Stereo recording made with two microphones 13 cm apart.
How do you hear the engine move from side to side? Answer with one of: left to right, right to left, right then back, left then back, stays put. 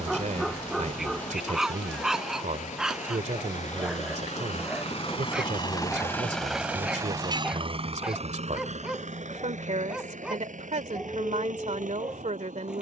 left to right.